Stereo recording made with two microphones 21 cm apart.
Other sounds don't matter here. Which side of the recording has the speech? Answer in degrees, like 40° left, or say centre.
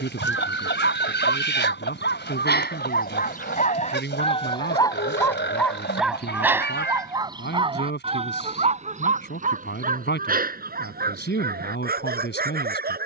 60° left.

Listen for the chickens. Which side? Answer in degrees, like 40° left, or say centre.
60° left.